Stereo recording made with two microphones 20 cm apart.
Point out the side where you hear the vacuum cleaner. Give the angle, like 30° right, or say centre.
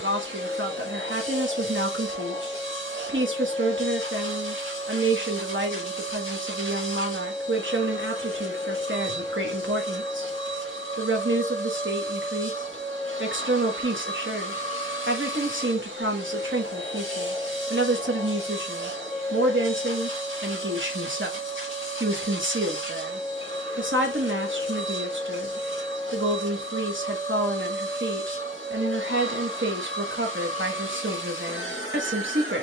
80° right.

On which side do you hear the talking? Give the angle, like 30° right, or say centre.
80° right.